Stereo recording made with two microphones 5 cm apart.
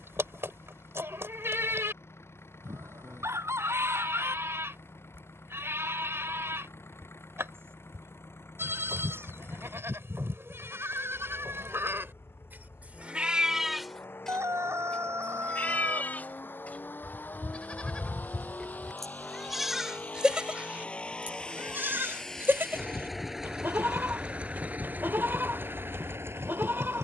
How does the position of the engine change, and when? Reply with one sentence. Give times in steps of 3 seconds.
In this clip you hear the engine on the left from 0 s, in the centre from 21 s and on the right from 24 s.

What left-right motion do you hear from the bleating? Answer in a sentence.
In this clip you hear the bleating go left and come back.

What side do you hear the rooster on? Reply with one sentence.
You can hear the rooster on the right.